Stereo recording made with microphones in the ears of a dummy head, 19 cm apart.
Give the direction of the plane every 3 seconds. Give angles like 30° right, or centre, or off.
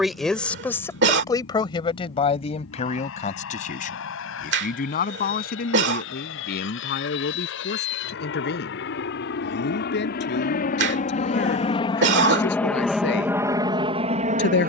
70° left, 70° left, 60° left, 40° left, 10° right.